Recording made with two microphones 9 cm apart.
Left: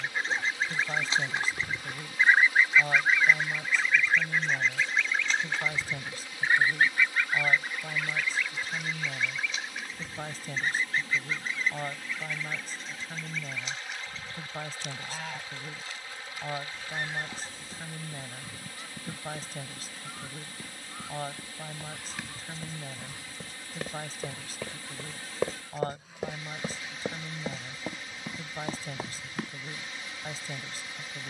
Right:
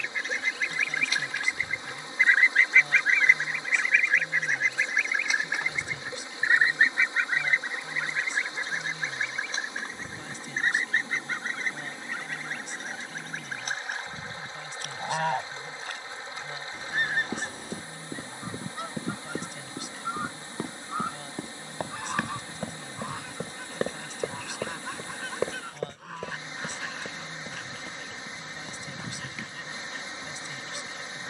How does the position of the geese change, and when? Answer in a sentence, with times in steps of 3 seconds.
In this clip you hear the geese on the left from 0 s, in the centre from 3 s and on the right from 6 s.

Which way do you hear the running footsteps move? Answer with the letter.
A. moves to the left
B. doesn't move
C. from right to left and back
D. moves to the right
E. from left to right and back
A.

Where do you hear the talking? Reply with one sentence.
In this clip you hear the talking on the left.